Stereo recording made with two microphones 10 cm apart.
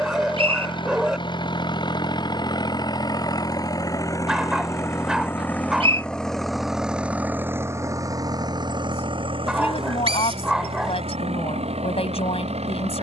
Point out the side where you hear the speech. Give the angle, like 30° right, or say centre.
80° left.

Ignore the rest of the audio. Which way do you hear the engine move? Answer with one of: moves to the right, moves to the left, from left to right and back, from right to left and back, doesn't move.
moves to the right.